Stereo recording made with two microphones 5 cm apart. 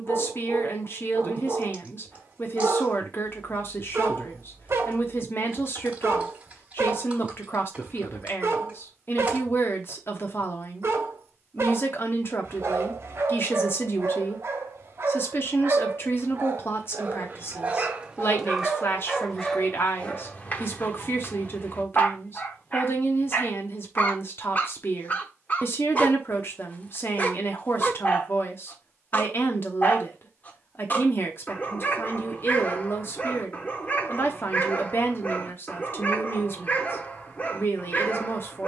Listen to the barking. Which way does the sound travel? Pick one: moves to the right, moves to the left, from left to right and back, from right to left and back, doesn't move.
moves to the left.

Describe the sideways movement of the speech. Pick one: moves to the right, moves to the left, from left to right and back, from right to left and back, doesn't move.
doesn't move.